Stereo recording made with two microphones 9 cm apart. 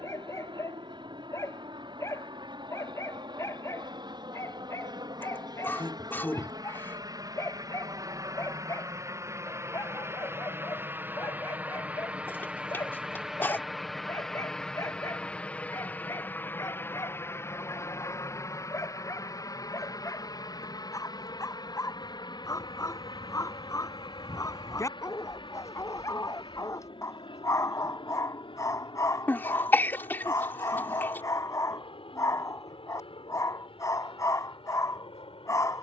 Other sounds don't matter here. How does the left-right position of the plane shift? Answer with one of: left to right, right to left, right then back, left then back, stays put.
right to left.